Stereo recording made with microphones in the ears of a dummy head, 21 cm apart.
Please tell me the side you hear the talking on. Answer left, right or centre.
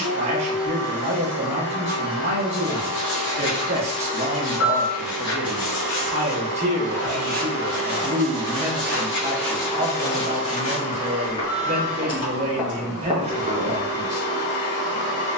right.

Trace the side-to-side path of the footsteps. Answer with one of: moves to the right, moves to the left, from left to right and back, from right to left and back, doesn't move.
from right to left and back.